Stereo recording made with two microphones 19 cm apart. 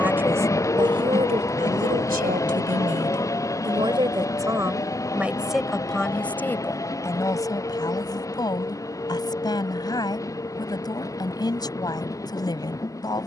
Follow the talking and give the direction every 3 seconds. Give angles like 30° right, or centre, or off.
30° right, 10° right, 20° left, 20° left, 20° left.